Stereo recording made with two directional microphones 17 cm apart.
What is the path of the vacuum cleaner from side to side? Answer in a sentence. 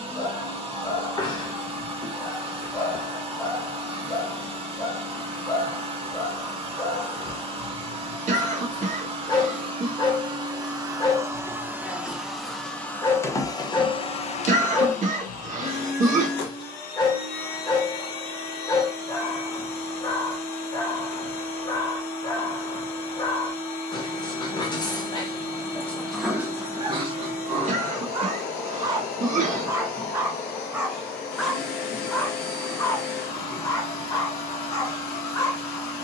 In this clip you hear the vacuum cleaner move to the left.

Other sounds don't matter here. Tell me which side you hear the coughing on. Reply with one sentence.
In this clip you hear the coughing on the right.